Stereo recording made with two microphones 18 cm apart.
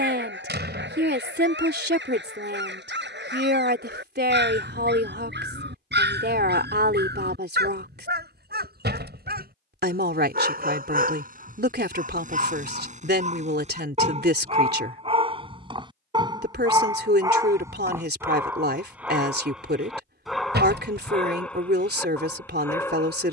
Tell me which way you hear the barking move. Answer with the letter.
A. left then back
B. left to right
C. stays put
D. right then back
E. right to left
E.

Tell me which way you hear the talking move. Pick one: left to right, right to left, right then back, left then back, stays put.
stays put.